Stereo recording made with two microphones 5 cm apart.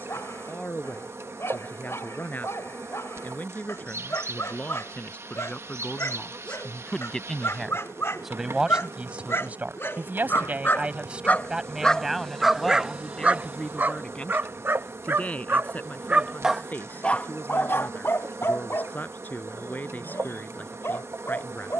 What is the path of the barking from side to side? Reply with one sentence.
In this clip you hear the barking go right and come back.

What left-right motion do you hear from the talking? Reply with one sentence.
You can hear the talking go right and come back.